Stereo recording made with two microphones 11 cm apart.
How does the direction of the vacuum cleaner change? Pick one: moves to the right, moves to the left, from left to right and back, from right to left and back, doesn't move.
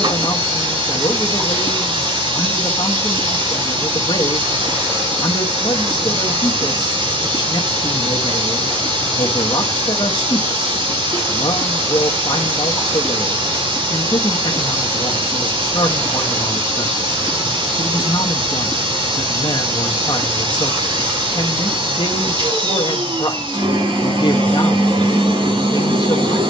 doesn't move.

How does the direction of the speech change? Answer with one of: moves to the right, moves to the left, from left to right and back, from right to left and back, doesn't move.
doesn't move.